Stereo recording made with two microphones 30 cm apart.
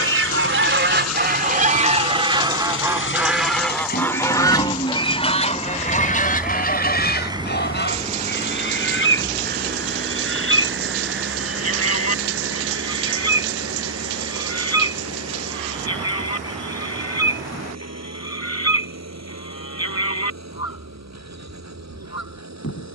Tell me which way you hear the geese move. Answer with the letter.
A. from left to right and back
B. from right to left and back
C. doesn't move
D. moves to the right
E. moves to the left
E.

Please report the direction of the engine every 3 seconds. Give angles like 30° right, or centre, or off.
60° left, 20° left, 10° right, 40° right, 50° right, 60° right, 60° right, 60° right.